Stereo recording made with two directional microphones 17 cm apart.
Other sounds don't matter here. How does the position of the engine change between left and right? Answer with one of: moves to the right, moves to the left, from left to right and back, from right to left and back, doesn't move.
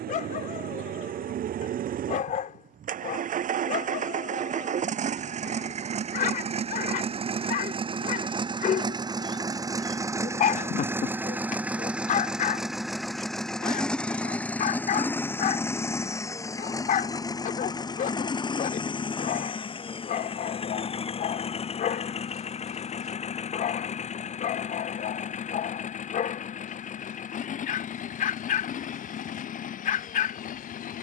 moves to the left.